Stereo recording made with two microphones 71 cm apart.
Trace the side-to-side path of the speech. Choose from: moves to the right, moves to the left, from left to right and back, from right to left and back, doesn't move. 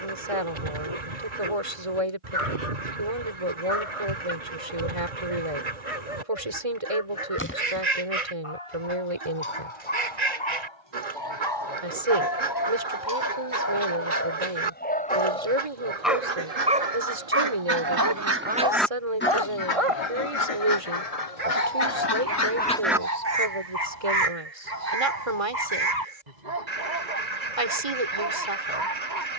doesn't move.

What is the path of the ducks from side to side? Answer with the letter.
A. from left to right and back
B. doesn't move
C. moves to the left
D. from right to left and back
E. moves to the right
D.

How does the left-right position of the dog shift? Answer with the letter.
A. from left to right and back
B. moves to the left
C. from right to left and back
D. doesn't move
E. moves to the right
E.